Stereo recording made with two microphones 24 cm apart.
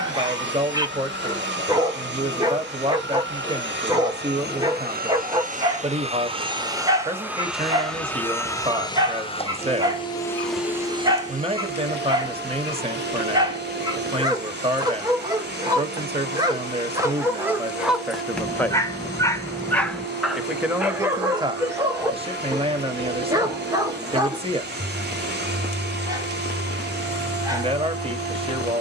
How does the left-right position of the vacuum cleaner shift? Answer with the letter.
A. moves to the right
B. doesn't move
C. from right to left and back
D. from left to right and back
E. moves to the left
C.